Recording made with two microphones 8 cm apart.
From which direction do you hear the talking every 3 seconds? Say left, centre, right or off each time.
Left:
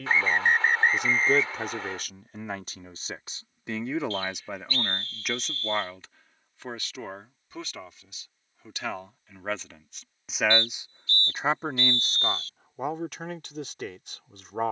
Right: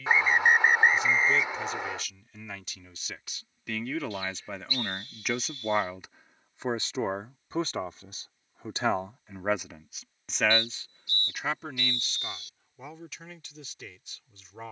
left, centre, right, centre, left.